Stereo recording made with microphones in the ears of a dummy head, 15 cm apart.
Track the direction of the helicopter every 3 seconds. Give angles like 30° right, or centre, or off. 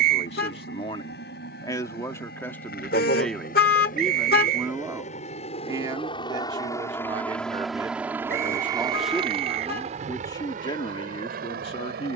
70° left, 50° left, centre, 50° right.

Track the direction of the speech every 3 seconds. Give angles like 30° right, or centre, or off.
20° left, 10° right, 20° right, 20° left.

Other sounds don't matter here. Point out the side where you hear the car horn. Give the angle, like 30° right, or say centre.
60° left.